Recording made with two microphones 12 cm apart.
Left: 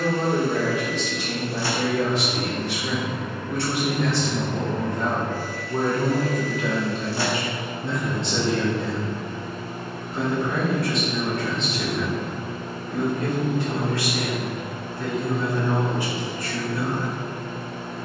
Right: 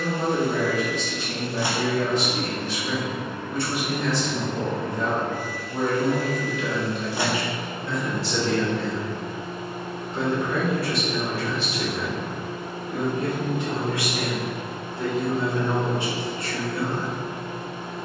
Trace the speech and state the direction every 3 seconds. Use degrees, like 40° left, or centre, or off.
70° left, 60° left, 30° left, centre, 20° right, 30° right.